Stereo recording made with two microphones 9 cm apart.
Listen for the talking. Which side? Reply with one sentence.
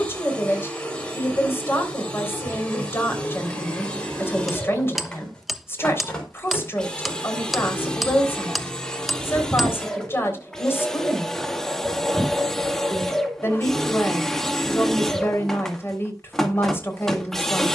In this clip you hear the talking on the left.